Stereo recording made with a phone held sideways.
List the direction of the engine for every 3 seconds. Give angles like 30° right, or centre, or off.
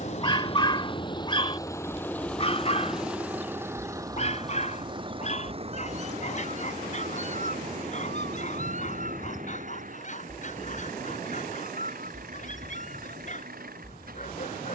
20° left, 20° right, 50° right, 60° right, 60° right.